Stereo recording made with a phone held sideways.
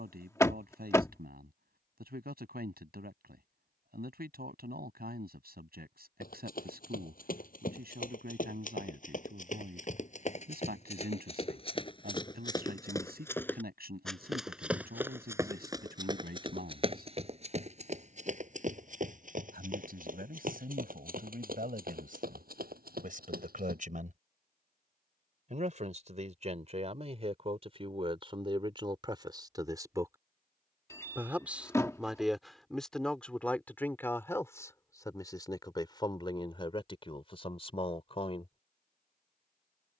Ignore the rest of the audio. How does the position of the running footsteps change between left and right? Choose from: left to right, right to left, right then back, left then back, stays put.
left to right.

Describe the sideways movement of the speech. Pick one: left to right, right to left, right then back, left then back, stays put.
right to left.